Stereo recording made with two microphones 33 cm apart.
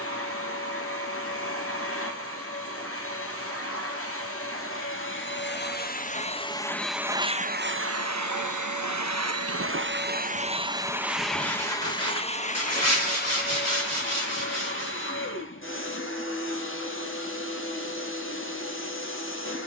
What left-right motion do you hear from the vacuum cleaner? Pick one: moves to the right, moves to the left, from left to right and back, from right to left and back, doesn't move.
from left to right and back.